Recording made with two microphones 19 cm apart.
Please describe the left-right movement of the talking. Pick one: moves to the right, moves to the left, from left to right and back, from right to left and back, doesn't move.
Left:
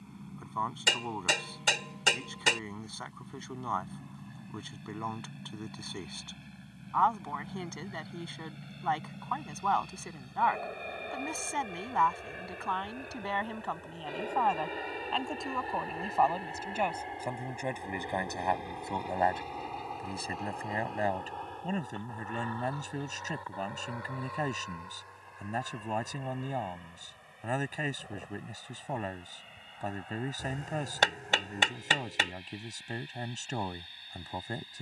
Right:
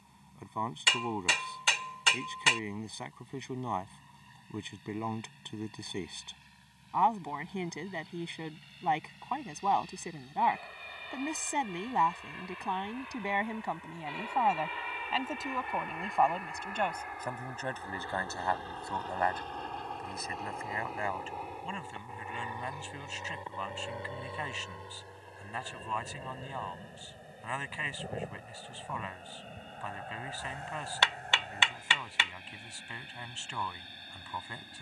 moves to the left.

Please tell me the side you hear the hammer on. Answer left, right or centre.
left.